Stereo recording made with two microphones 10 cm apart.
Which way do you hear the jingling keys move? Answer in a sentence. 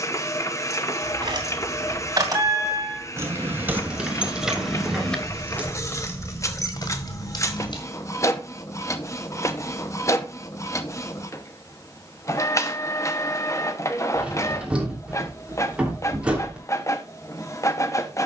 You can hear the jingling keys move from right to left.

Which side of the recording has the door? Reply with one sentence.
In this clip you hear the door in the centre.